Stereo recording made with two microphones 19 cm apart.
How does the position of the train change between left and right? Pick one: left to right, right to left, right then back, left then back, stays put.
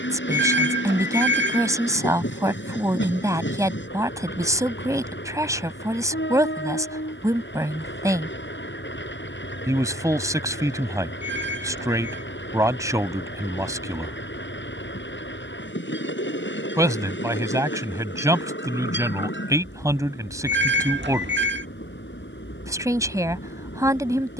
stays put.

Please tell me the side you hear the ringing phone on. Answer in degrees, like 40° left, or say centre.
80° right.